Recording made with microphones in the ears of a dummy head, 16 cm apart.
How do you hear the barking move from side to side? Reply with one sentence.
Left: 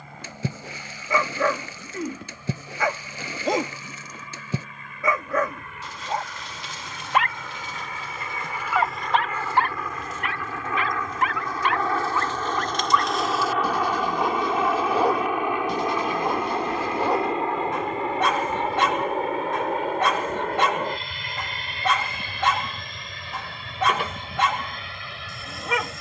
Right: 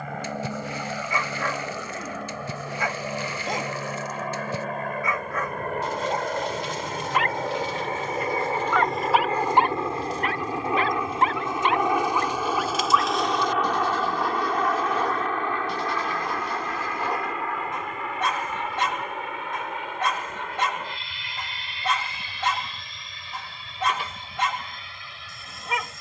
You can hear the barking move from left to right and back again.